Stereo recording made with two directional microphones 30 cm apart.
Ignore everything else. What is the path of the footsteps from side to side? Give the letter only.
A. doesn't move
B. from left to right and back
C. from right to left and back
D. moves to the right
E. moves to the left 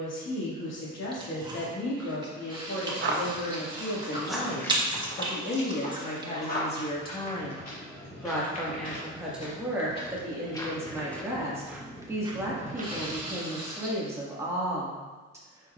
C.